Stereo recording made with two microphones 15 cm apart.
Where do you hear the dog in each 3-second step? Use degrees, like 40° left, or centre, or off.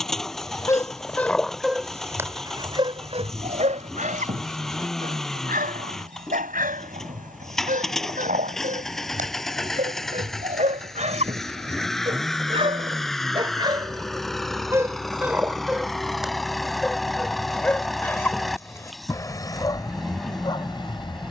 centre, 60° right, 70° right, 60° right, 30° right, centre, 20° left.